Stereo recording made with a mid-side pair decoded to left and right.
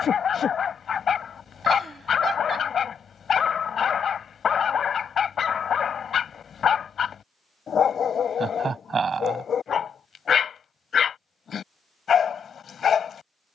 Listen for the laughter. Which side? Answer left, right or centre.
right.